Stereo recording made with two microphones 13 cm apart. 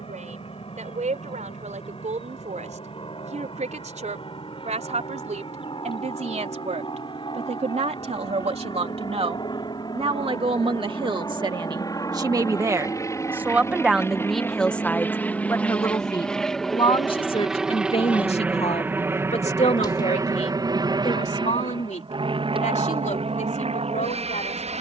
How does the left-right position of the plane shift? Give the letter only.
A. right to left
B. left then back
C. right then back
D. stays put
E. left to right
E.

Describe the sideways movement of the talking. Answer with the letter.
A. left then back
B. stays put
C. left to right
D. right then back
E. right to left
E.